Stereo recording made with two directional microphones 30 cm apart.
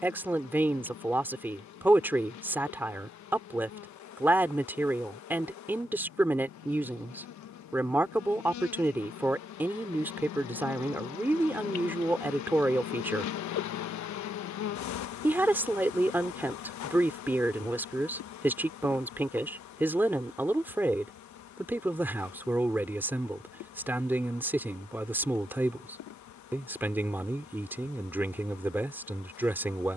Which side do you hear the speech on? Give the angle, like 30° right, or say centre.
10° right.